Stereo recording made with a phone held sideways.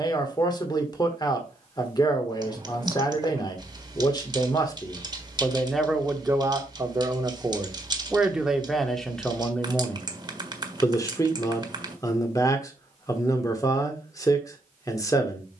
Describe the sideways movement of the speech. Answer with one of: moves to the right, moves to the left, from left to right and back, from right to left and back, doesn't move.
from left to right and back.